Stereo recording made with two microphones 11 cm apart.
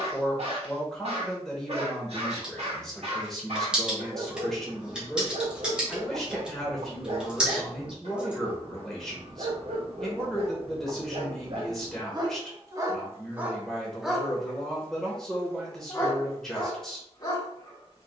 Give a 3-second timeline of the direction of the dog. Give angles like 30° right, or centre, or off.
70° right, 70° right, 70° right, 60° right, 10° right, 30° left.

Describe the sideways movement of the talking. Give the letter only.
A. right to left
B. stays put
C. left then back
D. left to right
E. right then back
B.